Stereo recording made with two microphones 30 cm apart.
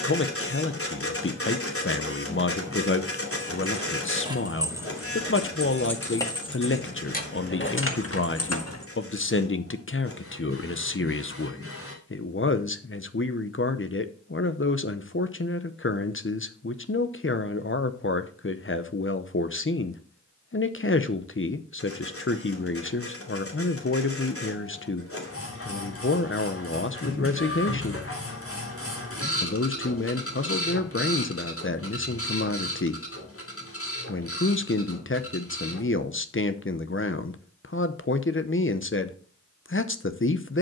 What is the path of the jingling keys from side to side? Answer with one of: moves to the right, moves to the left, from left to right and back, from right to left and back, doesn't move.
moves to the left.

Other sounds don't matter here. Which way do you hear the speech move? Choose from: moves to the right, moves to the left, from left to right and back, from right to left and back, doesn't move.
doesn't move.